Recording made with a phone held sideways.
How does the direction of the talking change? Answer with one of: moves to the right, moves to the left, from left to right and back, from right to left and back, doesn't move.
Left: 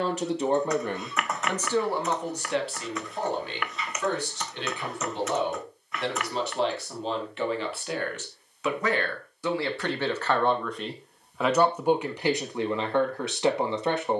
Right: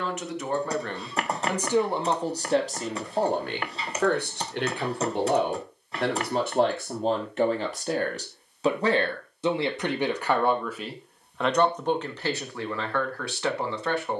from left to right and back.